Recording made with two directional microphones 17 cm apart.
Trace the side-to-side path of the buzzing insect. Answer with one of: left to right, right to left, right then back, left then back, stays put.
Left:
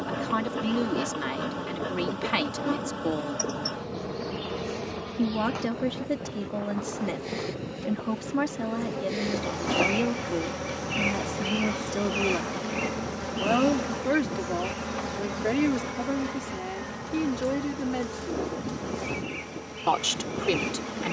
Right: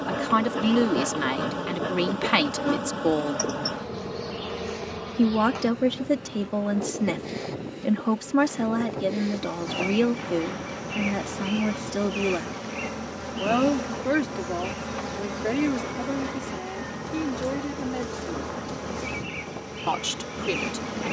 left then back.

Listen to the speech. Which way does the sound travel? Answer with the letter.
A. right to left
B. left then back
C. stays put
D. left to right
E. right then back
A.